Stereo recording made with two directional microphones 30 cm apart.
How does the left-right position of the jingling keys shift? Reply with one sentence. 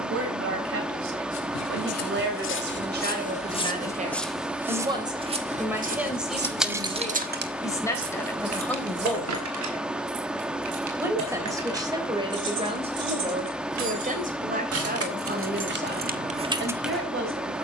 You can hear the jingling keys go right and come back.